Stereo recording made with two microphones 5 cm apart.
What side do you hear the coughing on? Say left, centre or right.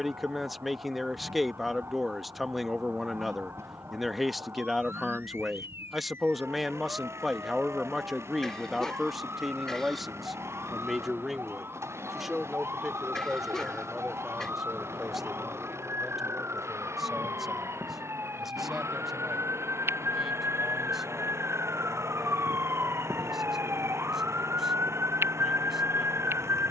centre.